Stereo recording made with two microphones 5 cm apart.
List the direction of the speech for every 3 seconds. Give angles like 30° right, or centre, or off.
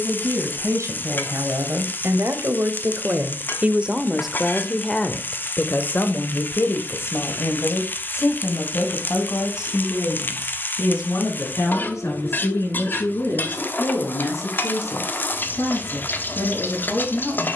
60° right, centre, 50° left, 70° left, 70° left, 80° left.